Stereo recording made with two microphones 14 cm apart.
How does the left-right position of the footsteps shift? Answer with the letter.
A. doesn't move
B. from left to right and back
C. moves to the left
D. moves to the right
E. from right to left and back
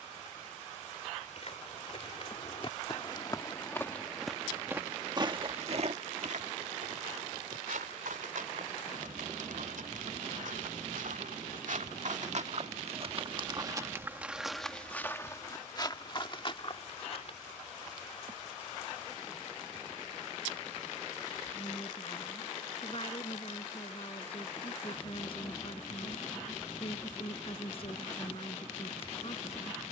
B.